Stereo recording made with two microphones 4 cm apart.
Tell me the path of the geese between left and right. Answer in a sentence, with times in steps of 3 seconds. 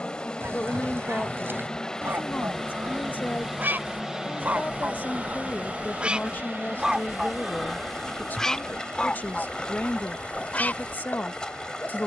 In this clip you hear the geese on the right from 0 s, in the centre from 6 s and on the left from 9 s.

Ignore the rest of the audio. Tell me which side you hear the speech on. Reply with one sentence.
In this clip you hear the speech on the left.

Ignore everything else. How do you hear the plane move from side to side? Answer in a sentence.
In this clip you hear the plane travel towards the right.